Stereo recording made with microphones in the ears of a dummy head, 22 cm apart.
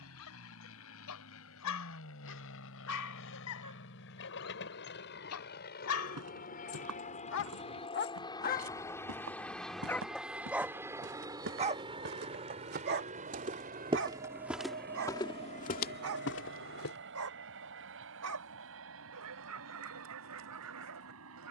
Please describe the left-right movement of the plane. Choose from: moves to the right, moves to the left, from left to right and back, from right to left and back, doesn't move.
moves to the right.